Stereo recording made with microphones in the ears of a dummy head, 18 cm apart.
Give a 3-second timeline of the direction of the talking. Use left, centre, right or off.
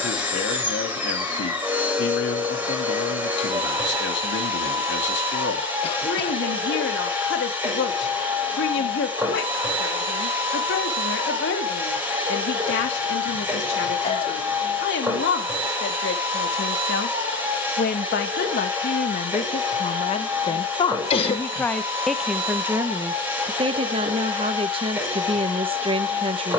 left, left, left, left, left, left, left, centre, right.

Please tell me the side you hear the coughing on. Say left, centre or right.
left.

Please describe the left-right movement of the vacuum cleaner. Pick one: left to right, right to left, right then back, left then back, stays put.
stays put.